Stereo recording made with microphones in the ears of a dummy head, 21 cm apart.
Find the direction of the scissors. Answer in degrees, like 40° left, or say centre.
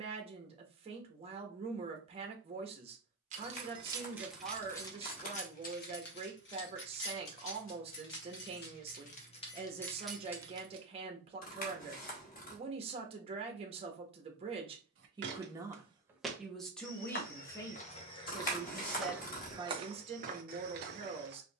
40° left.